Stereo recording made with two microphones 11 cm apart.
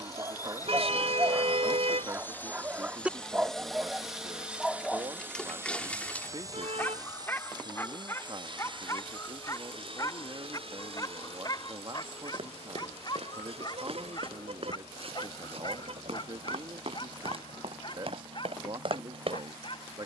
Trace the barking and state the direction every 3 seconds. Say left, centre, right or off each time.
right, centre, left, left, left, left, left.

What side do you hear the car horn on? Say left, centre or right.
right.